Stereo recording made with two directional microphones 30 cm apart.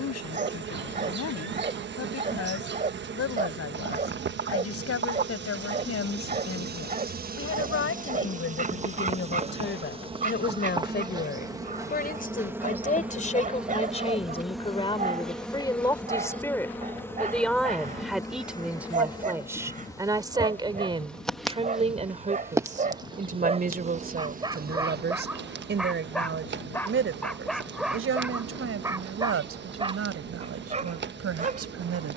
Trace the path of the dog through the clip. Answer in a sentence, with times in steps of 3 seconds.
In this clip you hear the dog on the right from 0 s, in the centre from 24 s and on the right from 30 s.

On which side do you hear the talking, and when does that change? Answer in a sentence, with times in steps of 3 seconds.
You can hear the talking on the left from 0 s, in the centre from 15 s and on the right from 21 s.